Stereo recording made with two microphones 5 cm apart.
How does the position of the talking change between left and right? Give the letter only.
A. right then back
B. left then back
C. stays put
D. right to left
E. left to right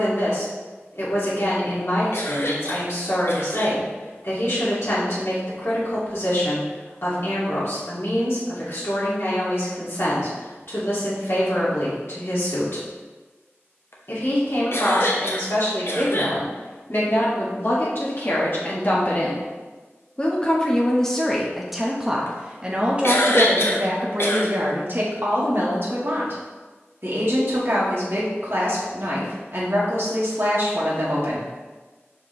E.